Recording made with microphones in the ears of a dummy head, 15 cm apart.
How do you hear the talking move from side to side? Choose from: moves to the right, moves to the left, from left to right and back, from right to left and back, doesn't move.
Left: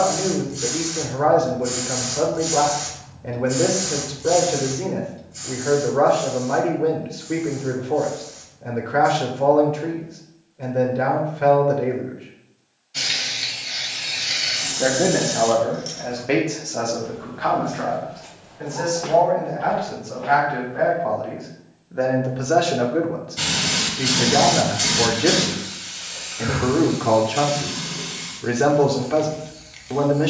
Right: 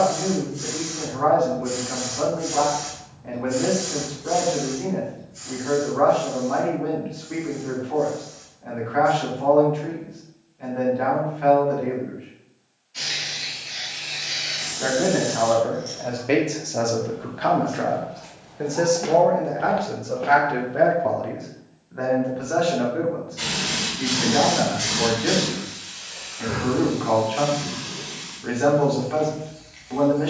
from left to right and back.